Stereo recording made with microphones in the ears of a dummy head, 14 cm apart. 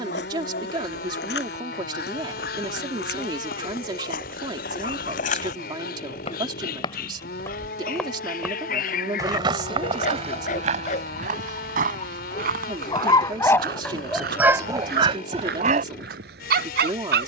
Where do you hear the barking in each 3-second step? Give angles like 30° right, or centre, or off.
60° left, 60° left, 60° left, 50° left, 10° left, 50° right.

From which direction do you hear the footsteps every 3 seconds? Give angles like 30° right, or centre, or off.
70° left, 60° left, 20° left, 40° right, 60° right, 70° right.